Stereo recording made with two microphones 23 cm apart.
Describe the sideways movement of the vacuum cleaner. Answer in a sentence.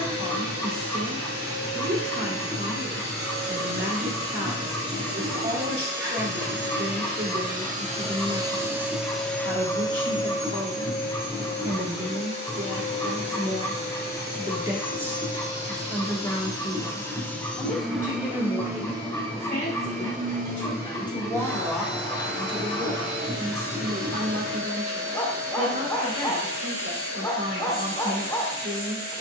You can hear the vacuum cleaner go left and come back.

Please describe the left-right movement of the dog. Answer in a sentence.
In this clip you hear the dog stay put.